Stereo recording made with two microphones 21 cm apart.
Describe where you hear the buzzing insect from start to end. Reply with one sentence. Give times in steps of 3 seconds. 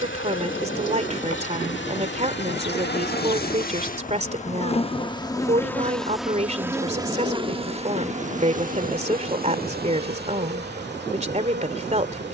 You can hear the buzzing insect on the left from 0 s and on the right from 6 s.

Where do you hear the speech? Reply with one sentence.
In this clip you hear the speech on the right.